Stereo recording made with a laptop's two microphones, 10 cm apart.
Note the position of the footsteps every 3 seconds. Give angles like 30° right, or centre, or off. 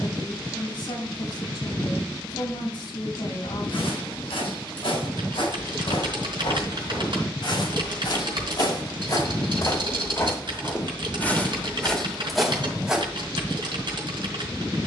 off, 80° left, 60° left, 30° left, centre.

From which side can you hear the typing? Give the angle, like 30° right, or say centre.
60° right.